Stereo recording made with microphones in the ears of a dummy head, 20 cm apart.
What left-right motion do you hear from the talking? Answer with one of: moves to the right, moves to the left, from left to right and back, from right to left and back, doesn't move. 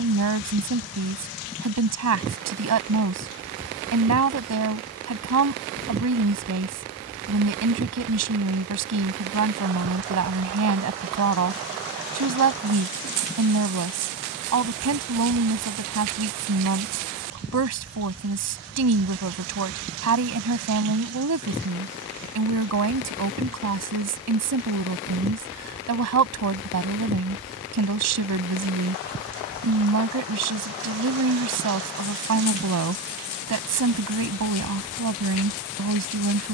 doesn't move.